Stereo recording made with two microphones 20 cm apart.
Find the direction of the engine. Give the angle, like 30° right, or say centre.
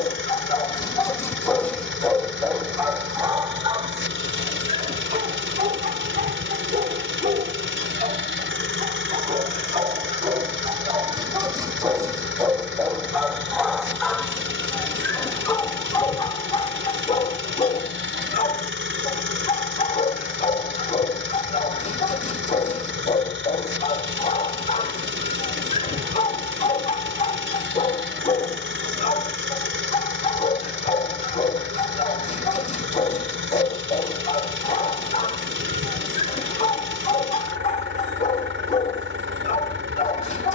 70° right.